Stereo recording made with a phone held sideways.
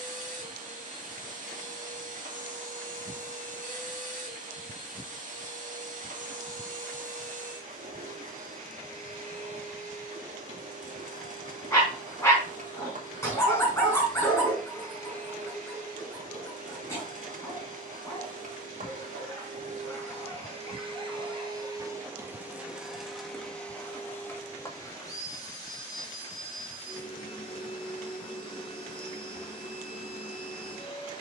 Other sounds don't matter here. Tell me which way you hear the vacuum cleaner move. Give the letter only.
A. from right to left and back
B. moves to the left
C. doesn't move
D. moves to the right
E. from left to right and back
B.